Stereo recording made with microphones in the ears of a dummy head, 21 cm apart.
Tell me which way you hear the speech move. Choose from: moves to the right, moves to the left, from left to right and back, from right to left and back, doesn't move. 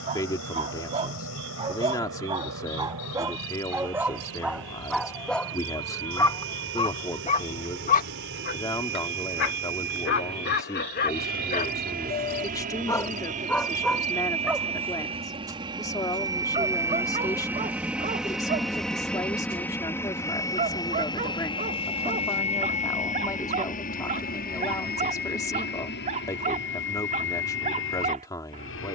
doesn't move.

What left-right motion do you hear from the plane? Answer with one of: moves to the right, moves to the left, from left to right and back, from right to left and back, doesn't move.
moves to the left.